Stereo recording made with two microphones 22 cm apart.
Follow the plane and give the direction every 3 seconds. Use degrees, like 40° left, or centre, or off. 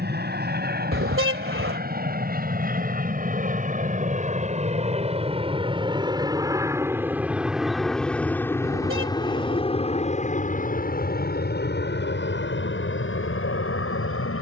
50° right, 30° right, centre, 30° left, 50° left.